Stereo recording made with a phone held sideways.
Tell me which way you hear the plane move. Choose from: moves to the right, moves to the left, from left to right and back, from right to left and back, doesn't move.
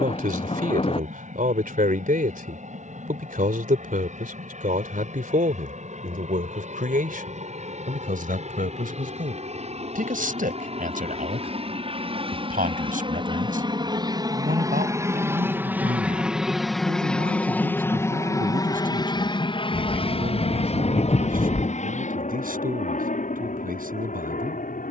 moves to the left.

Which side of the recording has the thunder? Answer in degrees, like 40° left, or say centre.
40° left.